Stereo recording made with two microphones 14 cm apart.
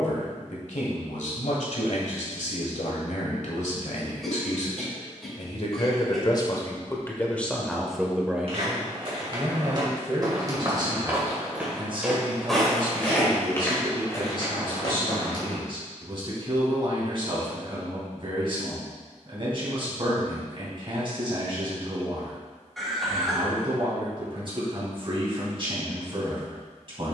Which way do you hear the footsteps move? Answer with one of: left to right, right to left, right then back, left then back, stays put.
right to left.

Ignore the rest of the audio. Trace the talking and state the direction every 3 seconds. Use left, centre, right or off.
left, left, centre, right, right, right, right, right, right.